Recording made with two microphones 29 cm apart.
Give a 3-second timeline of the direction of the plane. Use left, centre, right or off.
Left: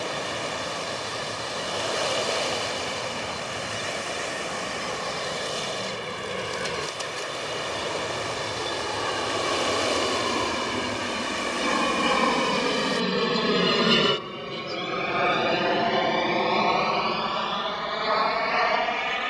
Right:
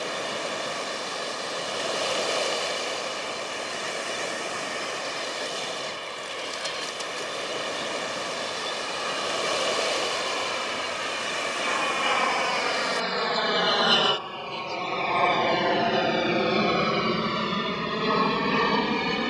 left, left, left, left, left, centre, right.